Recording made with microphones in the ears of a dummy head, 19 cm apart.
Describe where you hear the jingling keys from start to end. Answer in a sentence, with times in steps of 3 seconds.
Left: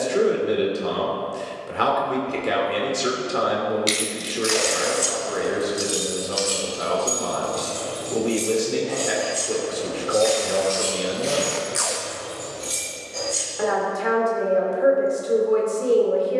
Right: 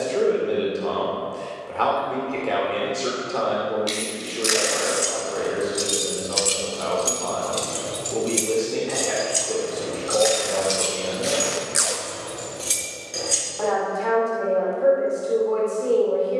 You can hear the jingling keys not at all from 0 s, in the centre from 3 s, on the right from 6 s and not at all from 15 s.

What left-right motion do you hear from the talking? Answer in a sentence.
In this clip you hear the talking stay put.